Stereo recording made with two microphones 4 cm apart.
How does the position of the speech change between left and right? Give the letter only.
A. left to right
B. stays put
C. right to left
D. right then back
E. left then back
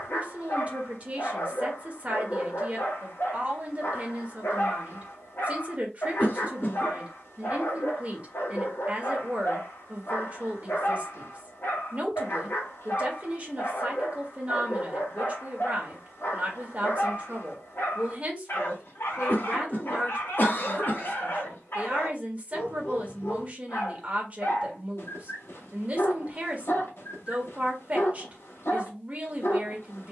B.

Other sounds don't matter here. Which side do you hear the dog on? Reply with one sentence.
You can hear the dog on the left.